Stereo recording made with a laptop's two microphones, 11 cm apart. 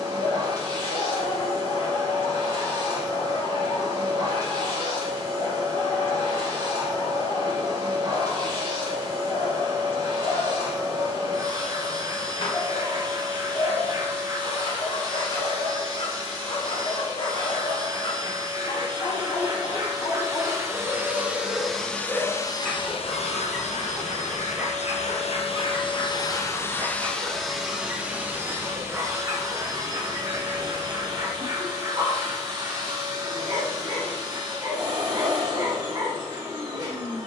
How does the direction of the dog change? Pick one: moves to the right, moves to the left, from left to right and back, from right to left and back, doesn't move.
moves to the right.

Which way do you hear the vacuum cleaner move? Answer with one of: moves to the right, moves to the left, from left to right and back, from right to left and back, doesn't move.
from right to left and back.